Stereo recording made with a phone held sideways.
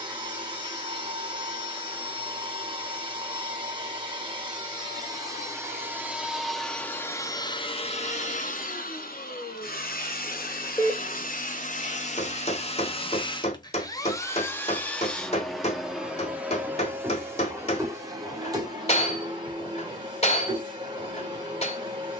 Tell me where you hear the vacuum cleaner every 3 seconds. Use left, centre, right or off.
right, right, left, left, left, centre, right, right.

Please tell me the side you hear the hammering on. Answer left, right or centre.
left.